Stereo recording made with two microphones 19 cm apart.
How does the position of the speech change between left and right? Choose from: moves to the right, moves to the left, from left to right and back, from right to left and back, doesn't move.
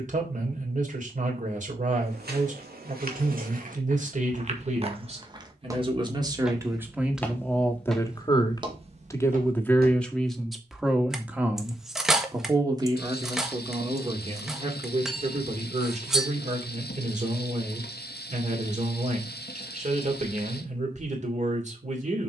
from right to left and back.